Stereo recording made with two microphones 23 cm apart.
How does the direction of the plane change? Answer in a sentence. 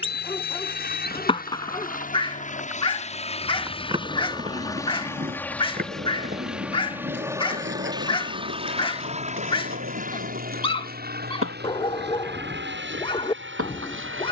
You can hear the plane move to the right.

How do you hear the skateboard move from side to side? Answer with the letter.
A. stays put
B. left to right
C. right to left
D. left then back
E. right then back
B.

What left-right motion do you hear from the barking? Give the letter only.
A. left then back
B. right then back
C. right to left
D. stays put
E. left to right
D.